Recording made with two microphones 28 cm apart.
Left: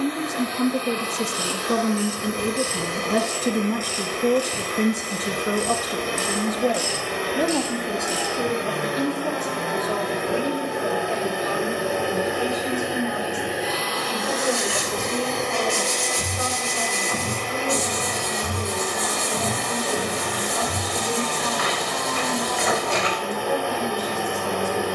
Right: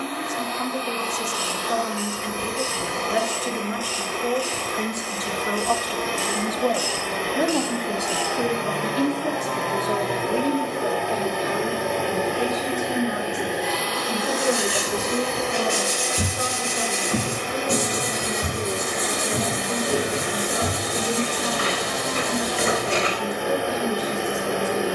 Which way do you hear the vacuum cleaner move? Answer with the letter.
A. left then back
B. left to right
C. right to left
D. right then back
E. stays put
B.